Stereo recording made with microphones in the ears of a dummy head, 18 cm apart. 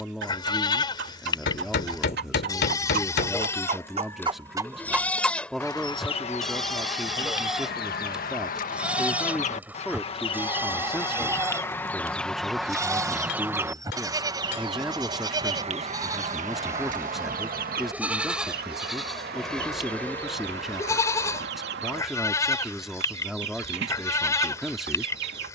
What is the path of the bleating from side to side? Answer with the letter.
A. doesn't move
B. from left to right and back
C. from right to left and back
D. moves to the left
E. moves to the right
B.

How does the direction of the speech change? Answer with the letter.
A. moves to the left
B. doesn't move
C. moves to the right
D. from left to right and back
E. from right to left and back
B.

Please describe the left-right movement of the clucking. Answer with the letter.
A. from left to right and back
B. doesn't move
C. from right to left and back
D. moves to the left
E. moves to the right
C.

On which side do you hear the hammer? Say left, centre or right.
left.